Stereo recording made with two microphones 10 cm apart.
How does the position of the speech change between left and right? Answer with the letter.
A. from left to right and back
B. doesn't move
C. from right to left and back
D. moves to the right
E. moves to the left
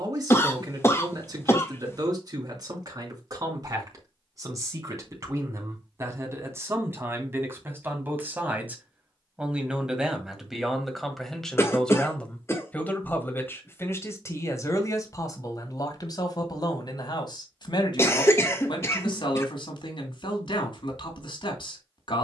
E.